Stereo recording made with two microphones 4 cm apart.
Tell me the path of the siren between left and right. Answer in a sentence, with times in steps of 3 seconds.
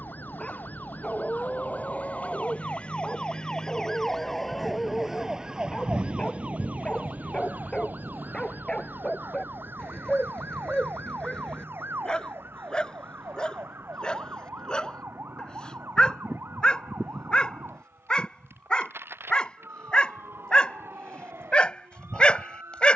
In this clip you hear the siren on the left from 0 s, in the centre from 3 s and on the right from 6 s.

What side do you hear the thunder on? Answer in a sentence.
You can hear the thunder on the right.